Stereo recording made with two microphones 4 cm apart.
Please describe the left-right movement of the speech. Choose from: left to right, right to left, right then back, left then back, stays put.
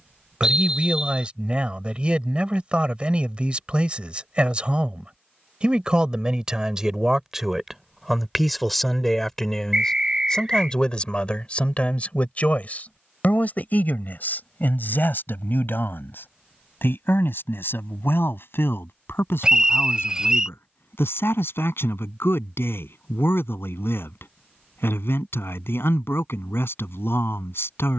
right to left.